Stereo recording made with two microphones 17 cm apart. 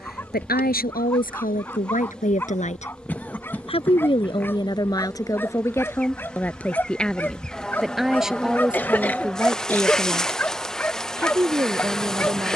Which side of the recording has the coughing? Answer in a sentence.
You can hear the coughing in the centre.